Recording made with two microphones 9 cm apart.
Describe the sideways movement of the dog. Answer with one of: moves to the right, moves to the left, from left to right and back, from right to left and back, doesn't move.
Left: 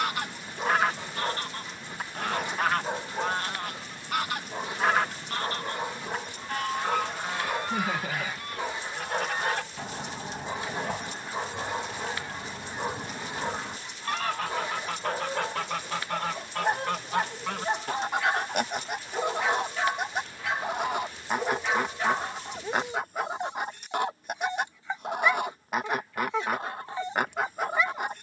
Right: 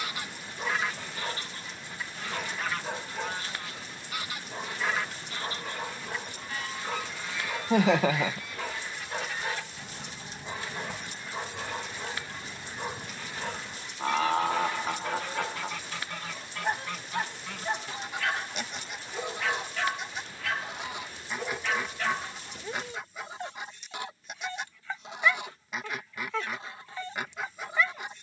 doesn't move.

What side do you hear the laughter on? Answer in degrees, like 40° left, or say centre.
70° right.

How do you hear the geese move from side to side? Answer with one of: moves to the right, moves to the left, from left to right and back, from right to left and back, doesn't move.
doesn't move.